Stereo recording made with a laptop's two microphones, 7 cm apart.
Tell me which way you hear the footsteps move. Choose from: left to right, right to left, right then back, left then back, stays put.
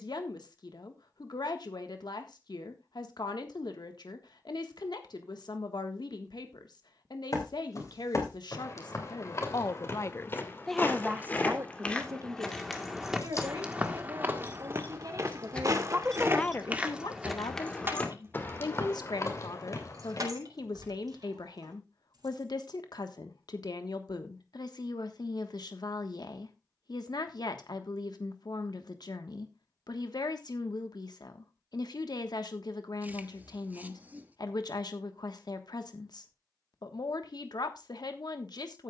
right then back.